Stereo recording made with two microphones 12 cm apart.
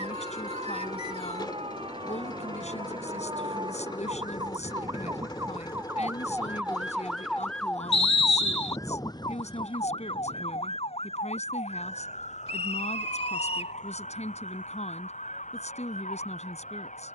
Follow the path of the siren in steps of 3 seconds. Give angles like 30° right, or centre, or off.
50° right, 30° right, 10° left, 50° left, 70° left, 80° left.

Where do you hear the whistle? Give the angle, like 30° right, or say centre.
50° left.